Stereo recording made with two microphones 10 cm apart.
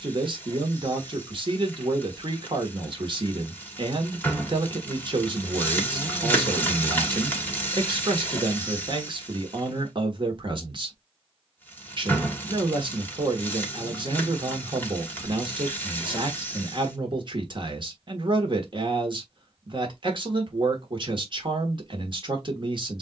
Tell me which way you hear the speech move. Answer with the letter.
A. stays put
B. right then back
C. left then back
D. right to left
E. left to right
A.